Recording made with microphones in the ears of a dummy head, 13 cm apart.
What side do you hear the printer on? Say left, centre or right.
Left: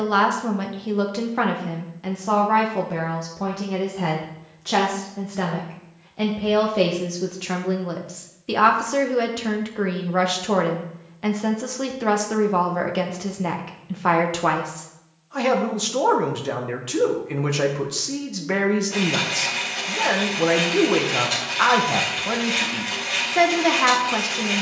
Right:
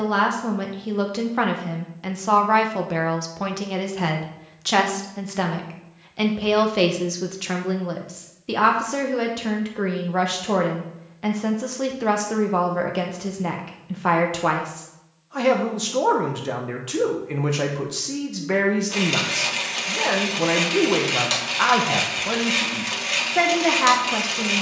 right.